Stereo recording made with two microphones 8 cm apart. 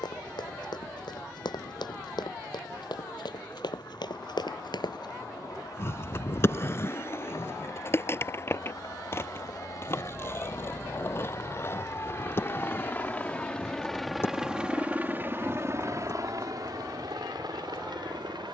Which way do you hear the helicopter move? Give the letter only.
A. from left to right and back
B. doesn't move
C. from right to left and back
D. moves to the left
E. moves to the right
E.